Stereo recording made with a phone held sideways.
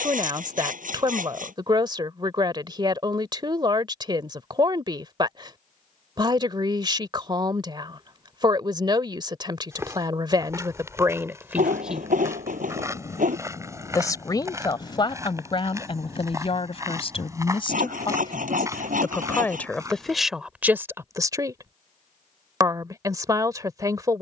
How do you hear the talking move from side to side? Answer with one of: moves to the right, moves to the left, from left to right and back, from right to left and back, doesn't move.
from right to left and back.